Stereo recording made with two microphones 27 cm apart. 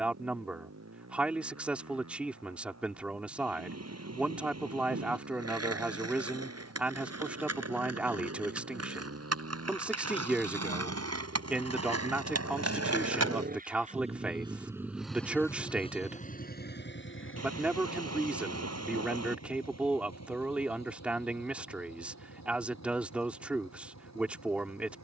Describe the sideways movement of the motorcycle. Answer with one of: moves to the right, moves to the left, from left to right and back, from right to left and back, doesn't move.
moves to the left.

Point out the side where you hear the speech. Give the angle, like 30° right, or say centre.
centre.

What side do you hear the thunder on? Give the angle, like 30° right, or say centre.
70° right.